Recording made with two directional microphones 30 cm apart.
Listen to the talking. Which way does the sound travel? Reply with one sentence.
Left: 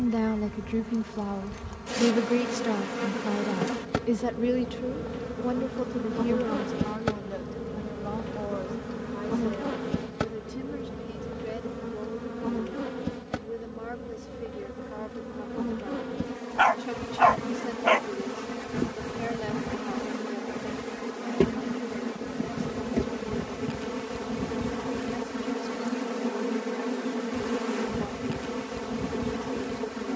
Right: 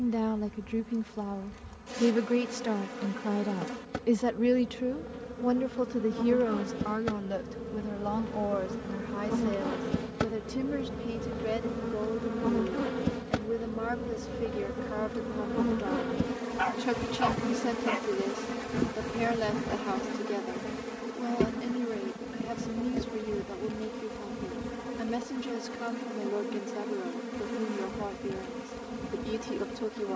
You can hear the talking travel towards the right.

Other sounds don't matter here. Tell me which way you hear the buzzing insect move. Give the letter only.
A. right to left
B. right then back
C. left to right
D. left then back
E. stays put
B.